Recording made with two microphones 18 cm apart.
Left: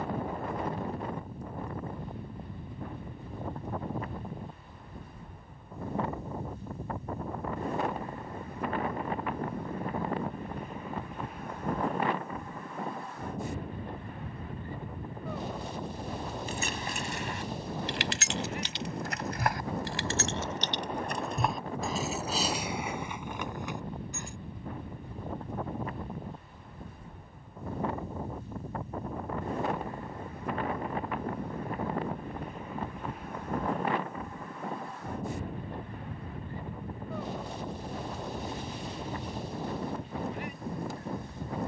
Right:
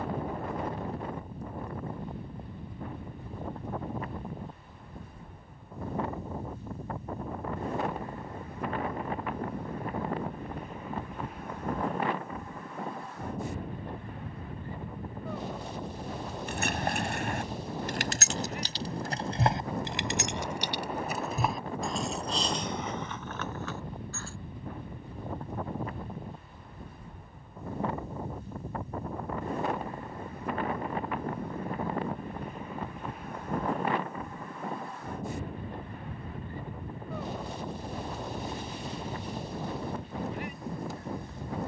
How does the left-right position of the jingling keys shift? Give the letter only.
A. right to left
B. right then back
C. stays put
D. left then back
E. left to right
A.